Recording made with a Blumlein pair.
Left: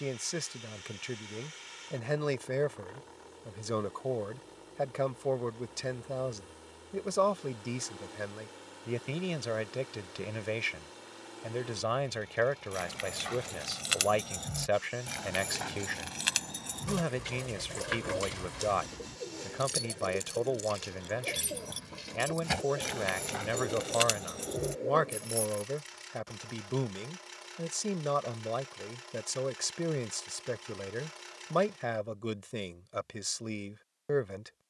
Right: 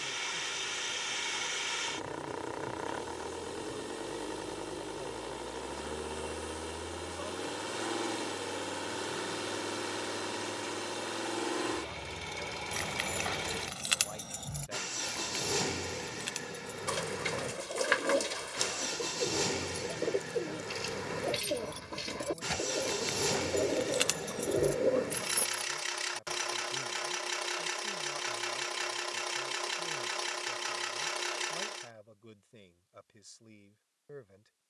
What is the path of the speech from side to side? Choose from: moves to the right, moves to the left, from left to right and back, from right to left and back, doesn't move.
doesn't move.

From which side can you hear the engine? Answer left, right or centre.
right.